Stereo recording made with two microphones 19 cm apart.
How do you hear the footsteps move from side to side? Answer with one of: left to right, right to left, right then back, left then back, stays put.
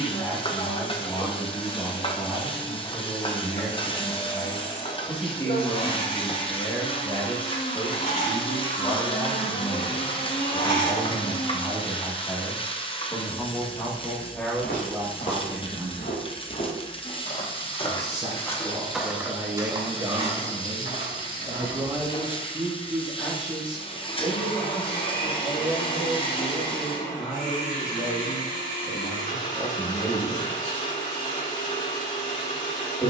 left to right.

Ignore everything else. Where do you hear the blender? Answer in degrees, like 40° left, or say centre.
50° left.